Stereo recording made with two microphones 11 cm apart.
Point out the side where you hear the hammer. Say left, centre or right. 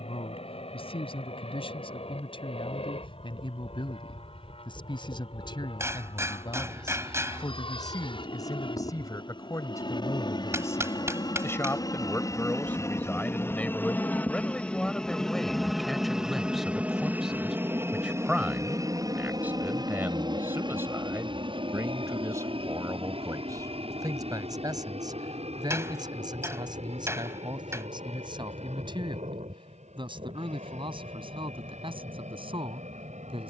right.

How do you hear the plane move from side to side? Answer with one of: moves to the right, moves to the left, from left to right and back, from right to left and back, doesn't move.
moves to the right.